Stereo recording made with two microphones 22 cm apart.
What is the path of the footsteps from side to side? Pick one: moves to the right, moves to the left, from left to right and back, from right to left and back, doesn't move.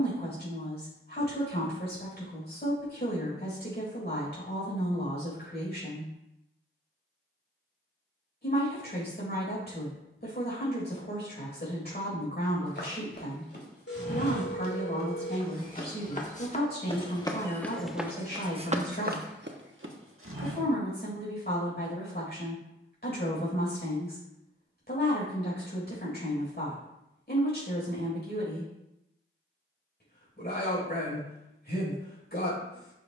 moves to the right.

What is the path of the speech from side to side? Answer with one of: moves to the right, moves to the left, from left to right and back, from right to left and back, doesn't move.
doesn't move.